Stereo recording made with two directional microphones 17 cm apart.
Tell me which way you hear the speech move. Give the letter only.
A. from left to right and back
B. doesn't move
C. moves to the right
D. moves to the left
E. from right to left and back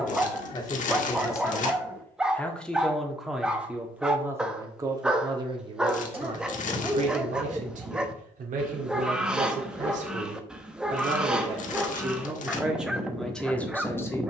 A.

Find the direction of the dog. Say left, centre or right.
centre.